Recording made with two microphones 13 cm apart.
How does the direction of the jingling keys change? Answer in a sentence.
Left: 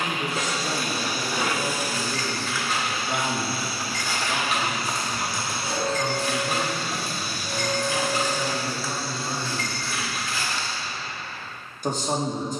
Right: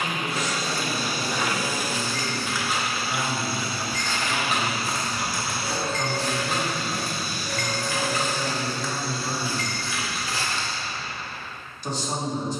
You can hear the jingling keys go right and come back.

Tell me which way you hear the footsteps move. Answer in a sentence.
In this clip you hear the footsteps go left and come back.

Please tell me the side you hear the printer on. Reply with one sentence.
In this clip you hear the printer in the centre.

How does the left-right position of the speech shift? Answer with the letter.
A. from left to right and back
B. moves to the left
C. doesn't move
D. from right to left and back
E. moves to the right
A.